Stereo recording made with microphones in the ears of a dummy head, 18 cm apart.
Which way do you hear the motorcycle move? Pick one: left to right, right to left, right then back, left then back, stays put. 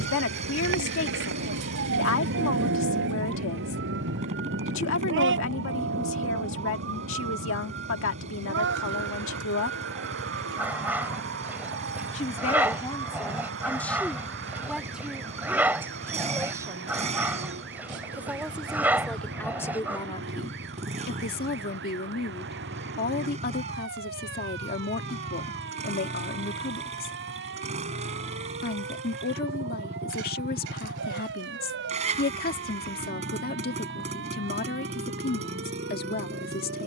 stays put.